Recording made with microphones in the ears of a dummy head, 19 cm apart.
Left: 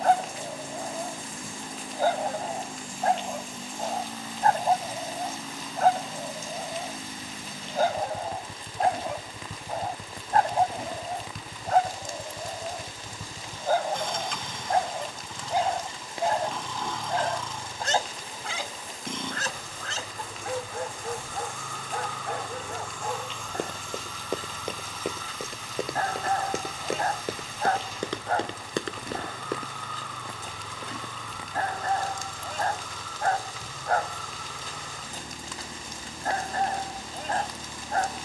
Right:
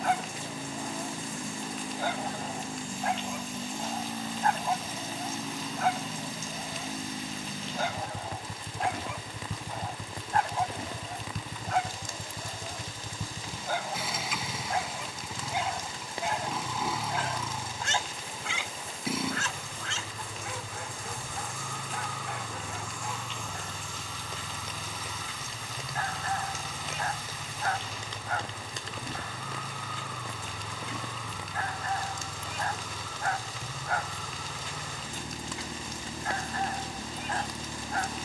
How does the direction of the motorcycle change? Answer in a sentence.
You can hear the motorcycle stay put.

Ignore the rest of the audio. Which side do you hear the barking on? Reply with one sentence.
In this clip you hear the barking on the left.